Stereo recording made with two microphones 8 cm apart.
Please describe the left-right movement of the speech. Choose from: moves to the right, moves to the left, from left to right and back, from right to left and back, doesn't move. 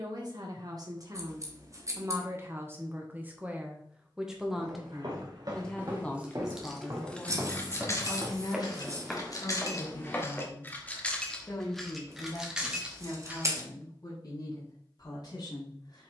moves to the left.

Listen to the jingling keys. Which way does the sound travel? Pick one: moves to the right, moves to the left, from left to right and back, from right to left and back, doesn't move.
from right to left and back.